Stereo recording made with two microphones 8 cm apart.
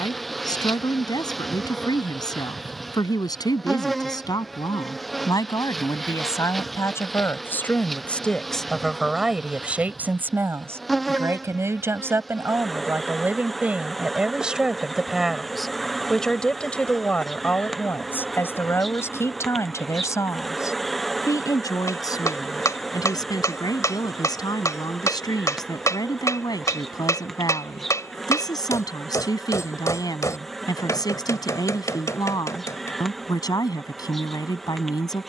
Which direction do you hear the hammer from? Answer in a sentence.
You can hear the hammer on the left.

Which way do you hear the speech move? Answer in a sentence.
In this clip you hear the speech go right and come back.